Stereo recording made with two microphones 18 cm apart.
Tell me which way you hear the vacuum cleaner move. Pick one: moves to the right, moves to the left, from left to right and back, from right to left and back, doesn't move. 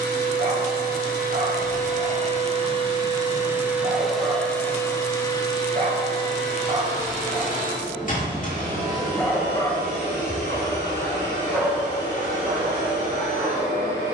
moves to the left.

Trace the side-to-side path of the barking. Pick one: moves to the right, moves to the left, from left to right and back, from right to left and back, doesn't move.
from right to left and back.